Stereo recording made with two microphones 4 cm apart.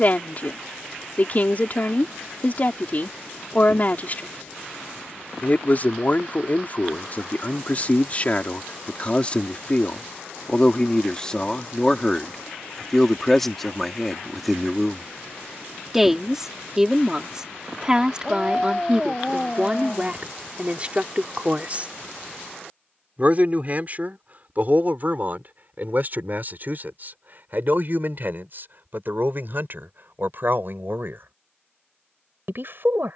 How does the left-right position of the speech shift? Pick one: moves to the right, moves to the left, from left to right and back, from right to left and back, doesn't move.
moves to the right.